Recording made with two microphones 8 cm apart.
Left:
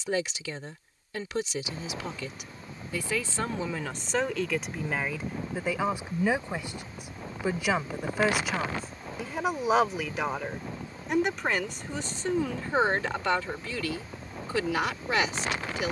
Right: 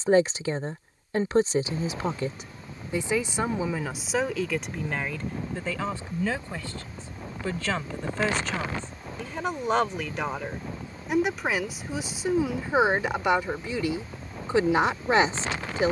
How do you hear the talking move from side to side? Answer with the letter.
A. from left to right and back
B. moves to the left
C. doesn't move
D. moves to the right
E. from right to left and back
E.